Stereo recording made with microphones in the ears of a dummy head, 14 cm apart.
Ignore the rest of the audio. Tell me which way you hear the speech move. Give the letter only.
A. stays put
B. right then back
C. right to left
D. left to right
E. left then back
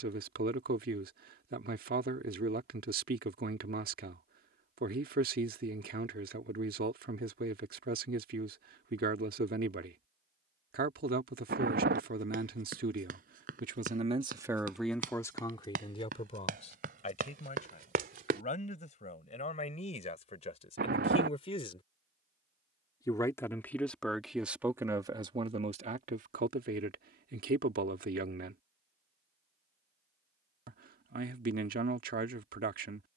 E.